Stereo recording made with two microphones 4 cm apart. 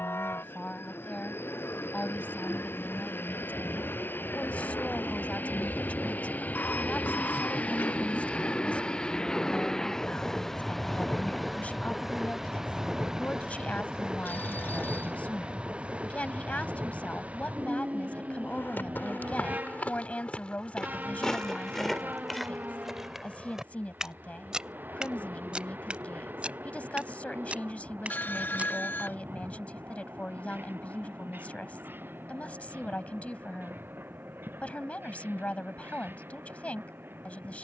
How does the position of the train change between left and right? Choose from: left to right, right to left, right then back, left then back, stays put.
left to right.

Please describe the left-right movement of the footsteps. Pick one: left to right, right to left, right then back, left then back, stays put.
left to right.